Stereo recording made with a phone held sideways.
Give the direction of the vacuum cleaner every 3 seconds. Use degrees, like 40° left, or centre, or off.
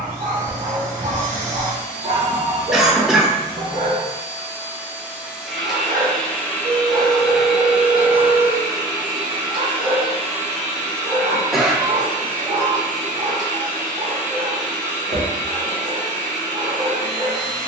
60° right, 20° right, 10° right, 40° right, 60° right, 60° right.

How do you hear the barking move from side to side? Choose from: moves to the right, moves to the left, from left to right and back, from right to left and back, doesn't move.
doesn't move.